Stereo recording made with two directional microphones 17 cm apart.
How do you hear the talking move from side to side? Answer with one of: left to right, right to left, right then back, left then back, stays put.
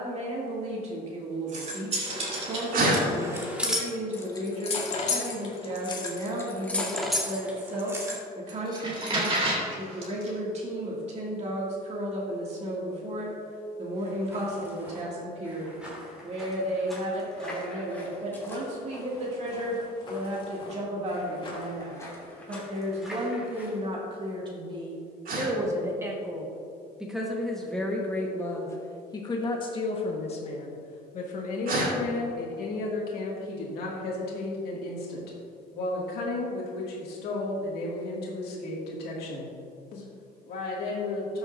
right to left.